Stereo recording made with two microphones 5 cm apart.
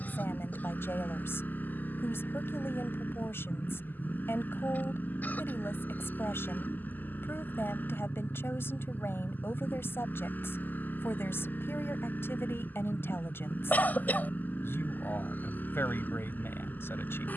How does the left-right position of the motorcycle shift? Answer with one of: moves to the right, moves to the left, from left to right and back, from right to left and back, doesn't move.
doesn't move.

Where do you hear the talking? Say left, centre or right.
left.